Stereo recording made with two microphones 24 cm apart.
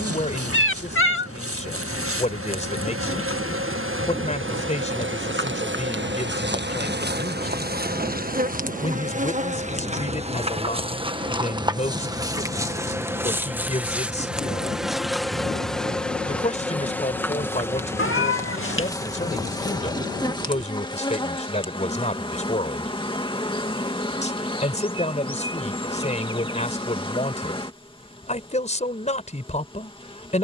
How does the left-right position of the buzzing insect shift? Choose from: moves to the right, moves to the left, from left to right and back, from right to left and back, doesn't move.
moves to the left.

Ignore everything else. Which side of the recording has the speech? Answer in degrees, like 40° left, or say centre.
30° left.